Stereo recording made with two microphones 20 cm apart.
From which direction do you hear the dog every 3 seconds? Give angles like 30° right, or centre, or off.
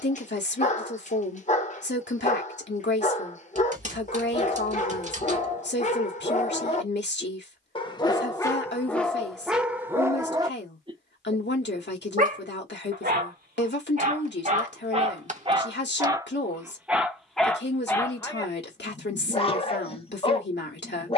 40° left, 40° left, 20° left, 10° right, 40° right, 10° right, 20° left.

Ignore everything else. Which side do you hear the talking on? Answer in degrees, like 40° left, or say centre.
60° left.